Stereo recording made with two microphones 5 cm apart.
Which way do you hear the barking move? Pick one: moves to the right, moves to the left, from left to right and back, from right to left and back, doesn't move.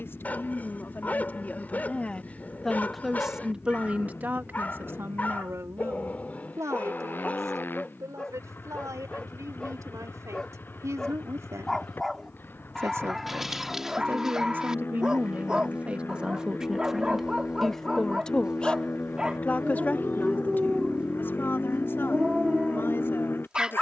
moves to the right.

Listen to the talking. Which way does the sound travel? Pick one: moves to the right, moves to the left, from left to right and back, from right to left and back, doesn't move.
from left to right and back.